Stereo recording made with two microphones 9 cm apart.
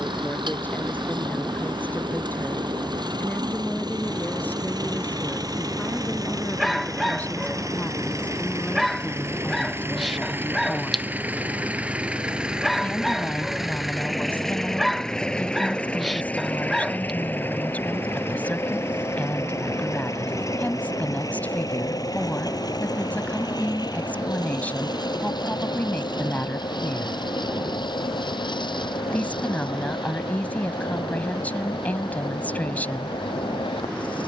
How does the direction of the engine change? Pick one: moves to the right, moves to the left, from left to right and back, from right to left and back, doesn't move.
moves to the left.